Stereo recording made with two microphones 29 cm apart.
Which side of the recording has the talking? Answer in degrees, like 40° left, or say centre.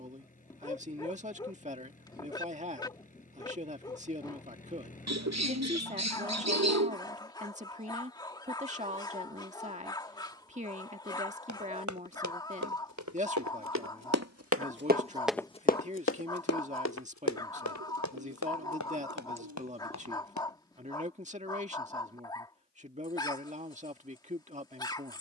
20° right.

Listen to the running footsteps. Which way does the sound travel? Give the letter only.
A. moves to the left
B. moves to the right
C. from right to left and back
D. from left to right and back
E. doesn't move
A.